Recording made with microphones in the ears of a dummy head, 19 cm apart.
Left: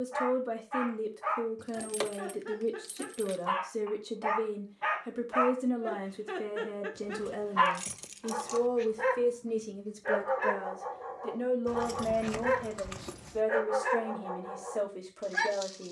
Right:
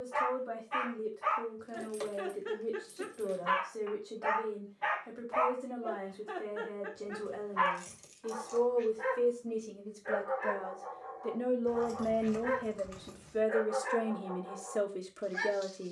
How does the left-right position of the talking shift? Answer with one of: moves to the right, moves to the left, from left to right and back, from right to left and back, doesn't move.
moves to the right.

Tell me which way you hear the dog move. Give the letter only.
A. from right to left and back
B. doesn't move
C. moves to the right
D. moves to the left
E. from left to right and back
D.